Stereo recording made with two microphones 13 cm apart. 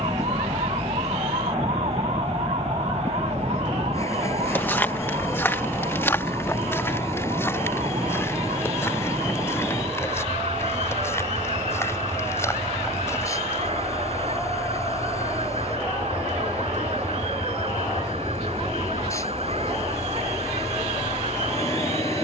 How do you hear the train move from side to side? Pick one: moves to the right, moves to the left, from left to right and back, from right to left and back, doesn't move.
doesn't move.